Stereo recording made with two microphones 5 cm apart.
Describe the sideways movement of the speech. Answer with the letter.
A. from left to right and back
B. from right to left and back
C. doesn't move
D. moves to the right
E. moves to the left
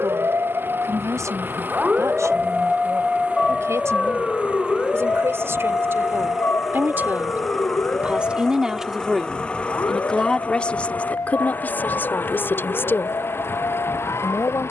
E.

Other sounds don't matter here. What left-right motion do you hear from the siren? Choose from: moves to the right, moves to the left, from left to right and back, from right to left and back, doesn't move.
moves to the left.